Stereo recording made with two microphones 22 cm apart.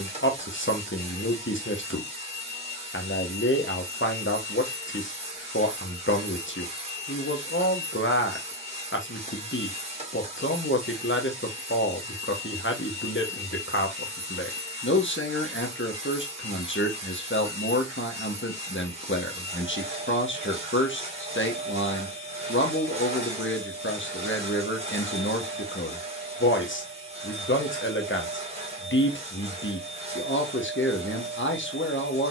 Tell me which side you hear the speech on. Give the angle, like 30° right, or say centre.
70° left.